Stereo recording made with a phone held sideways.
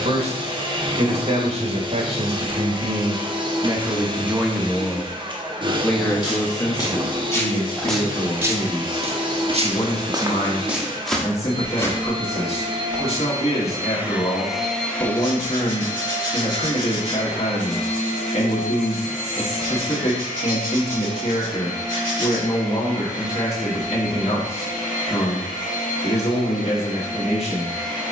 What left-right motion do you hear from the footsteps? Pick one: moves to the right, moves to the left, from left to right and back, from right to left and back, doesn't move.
from left to right and back.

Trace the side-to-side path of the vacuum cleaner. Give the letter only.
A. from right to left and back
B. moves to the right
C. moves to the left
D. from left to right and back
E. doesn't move
C.